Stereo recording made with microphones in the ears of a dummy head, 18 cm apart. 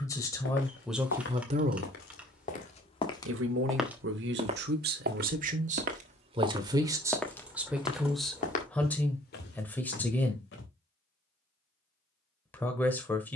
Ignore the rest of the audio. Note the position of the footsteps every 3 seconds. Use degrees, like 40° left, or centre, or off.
50° left, 20° right, 10° left, 50° left, off.